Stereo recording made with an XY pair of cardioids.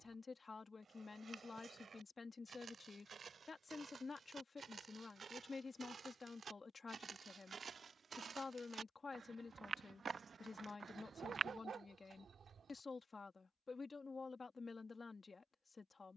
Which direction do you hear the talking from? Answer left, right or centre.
left.